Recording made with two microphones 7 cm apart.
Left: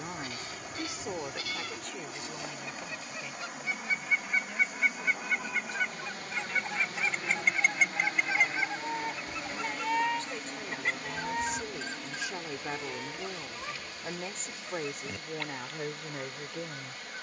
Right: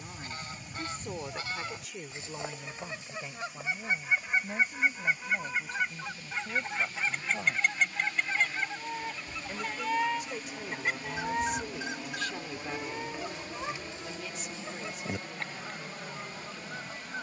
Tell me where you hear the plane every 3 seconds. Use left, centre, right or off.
left, left, left, centre, right, right.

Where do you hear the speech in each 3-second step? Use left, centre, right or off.
centre, right, right, centre, left, left.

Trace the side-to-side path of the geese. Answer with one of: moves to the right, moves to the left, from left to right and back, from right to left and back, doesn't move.
from right to left and back.